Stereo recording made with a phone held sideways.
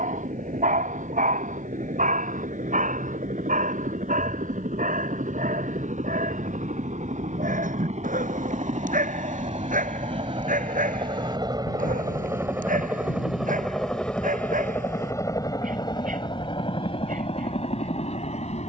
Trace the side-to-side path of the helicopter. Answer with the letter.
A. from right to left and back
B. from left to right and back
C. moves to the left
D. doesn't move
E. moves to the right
C.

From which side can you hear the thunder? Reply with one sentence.
In this clip you hear the thunder on the left.